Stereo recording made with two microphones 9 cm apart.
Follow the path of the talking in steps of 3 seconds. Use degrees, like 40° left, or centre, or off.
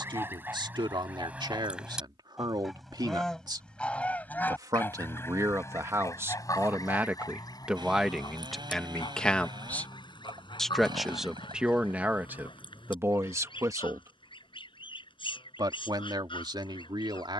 60° right, 40° right, 10° right, centre, 30° right, 60° right.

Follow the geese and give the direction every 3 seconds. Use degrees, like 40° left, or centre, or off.
10° right, 20° left, 50° left, 60° left, 70° left, 70° left.